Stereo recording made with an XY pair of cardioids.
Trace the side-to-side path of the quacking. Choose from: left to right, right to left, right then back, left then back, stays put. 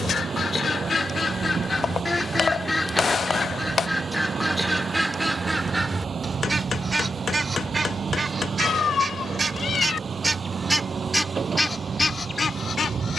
right then back.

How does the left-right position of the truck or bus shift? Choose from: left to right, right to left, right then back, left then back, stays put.
stays put.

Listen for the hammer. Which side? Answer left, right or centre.
left.